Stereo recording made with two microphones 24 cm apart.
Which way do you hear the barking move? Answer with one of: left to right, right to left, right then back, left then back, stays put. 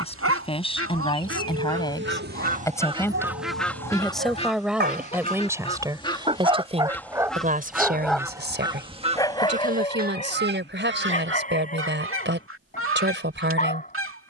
right to left.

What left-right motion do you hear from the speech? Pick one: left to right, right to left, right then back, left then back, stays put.
left to right.